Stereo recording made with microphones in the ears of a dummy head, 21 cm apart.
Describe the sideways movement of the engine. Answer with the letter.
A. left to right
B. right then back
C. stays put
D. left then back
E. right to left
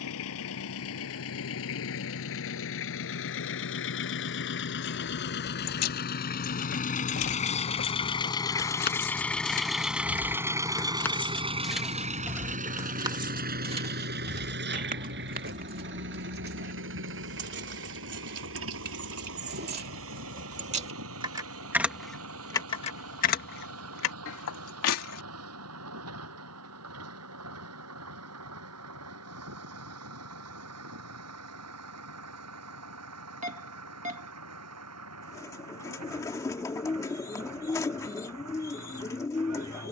A.